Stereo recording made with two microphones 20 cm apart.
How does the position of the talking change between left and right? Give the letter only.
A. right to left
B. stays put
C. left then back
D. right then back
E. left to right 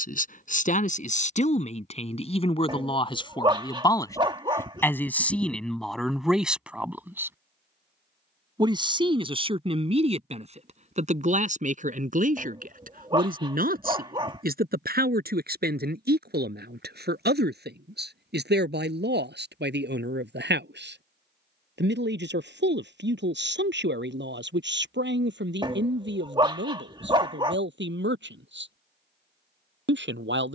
E.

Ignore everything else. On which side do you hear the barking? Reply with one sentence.
In this clip you hear the barking on the right.